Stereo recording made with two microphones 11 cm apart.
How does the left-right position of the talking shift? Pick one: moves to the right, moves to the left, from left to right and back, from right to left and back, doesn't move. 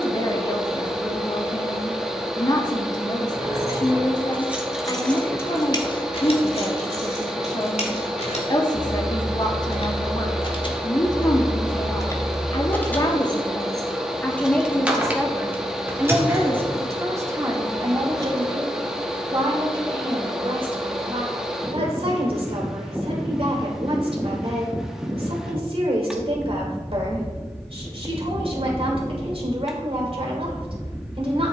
moves to the right.